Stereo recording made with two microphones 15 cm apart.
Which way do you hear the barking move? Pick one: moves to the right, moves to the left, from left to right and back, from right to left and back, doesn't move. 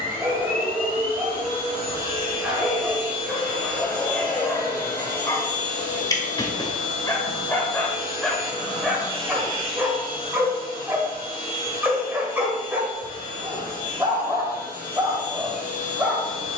from right to left and back.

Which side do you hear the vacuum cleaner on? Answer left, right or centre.
left.